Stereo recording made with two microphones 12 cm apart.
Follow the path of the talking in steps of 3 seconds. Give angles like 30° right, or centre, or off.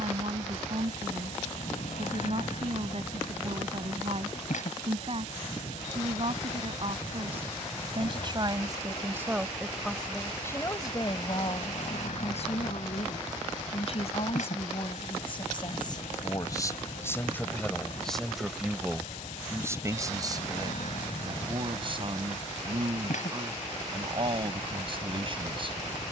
50° right, 50° right, 40° right, 20° left, 50° left, 30° left, 10° right, 40° right, 40° right.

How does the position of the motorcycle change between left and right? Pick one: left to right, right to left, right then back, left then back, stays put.
stays put.